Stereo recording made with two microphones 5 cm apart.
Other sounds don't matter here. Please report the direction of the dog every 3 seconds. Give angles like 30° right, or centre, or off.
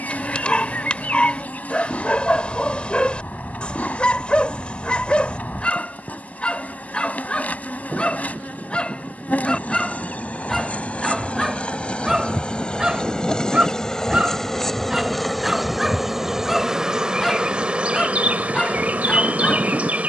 20° left, 20° left, 20° left, centre, 10° right, centre, 10° left.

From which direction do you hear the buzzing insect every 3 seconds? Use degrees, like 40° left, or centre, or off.
30° left, 30° left, 30° left, 20° left, 10° left, 10° right, 30° right.